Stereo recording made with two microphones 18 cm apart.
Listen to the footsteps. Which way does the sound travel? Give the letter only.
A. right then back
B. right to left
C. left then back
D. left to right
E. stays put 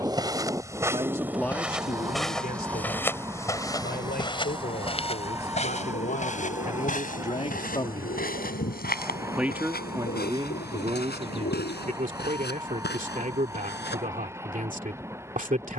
B.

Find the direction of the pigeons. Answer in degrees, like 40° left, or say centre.
80° left.